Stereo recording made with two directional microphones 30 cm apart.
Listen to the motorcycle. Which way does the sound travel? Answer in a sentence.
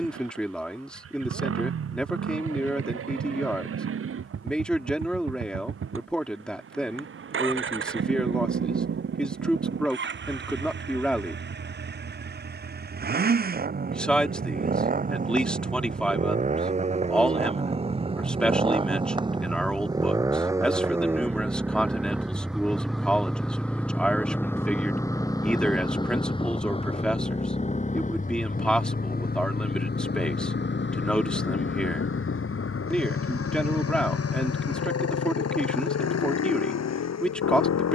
In this clip you hear the motorcycle travel towards the left.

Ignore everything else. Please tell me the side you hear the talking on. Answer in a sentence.
In this clip you hear the talking in the centre.